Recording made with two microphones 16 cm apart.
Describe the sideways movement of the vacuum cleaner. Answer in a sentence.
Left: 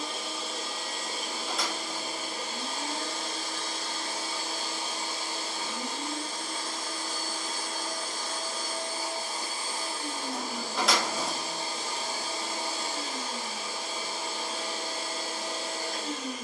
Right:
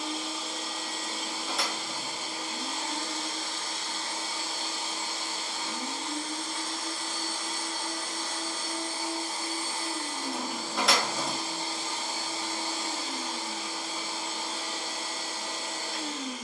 In this clip you hear the vacuum cleaner stay put.